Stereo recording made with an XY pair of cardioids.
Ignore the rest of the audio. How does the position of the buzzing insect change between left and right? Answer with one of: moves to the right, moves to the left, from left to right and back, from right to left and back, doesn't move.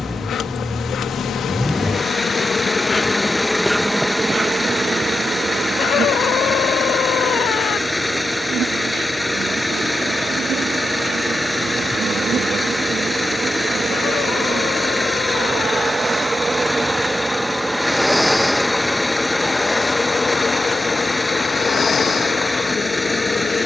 from left to right and back.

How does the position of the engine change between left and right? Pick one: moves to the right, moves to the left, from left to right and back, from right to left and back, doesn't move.
doesn't move.